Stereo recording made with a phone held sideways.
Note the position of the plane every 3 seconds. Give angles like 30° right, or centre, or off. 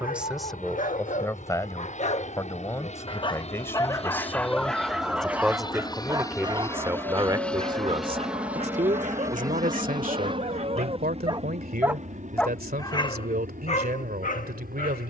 60° left, 40° left, 10° left, 30° right, 50° right.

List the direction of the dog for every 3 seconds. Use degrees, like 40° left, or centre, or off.
50° left, 10° left, 40° right, 50° right, 40° left.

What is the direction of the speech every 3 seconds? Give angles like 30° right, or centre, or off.
10° left, 10° left, 30° right, 70° right, 80° right.